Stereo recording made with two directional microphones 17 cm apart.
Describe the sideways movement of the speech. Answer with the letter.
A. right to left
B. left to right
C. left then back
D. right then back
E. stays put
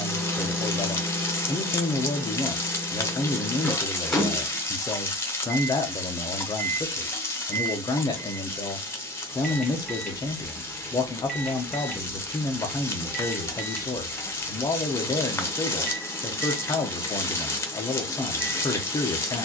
E.